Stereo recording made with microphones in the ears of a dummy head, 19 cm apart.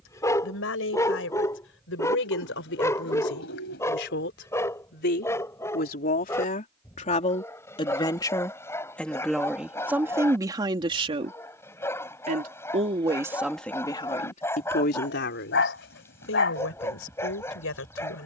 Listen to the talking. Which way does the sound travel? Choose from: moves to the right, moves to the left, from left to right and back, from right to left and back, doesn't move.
from left to right and back.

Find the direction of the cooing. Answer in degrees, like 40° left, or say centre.
60° left.